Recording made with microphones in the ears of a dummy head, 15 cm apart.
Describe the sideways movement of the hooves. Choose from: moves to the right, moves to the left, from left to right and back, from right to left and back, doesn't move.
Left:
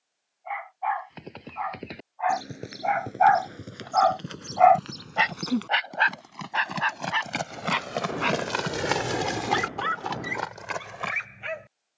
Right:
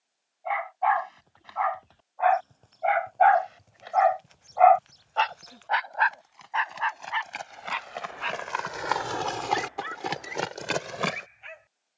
moves to the right.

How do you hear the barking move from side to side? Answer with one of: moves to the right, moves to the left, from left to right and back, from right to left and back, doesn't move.
moves to the left.